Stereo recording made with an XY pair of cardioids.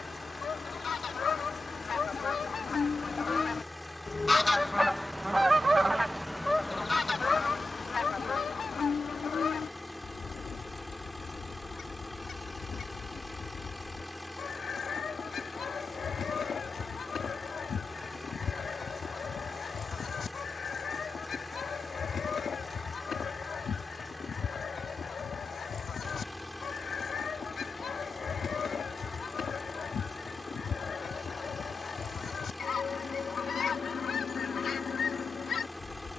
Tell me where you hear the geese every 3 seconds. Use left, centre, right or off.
left, centre, left, left, left, left, left, left, left, left, left, left.